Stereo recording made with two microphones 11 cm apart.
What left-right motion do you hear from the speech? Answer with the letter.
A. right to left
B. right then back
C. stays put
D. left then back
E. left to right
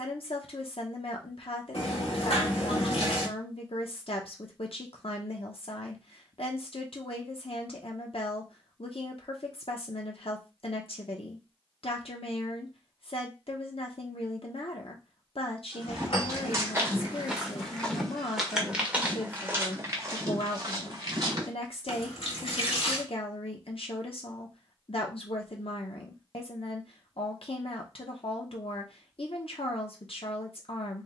C.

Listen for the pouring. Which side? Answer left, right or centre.
left.